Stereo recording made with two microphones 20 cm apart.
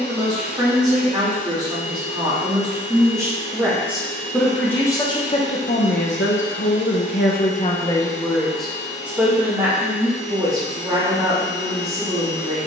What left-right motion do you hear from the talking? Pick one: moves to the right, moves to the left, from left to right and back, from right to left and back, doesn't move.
from right to left and back.